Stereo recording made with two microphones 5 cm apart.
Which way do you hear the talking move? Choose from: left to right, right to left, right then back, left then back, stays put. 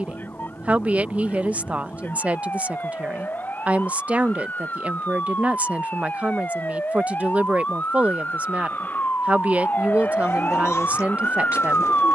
stays put.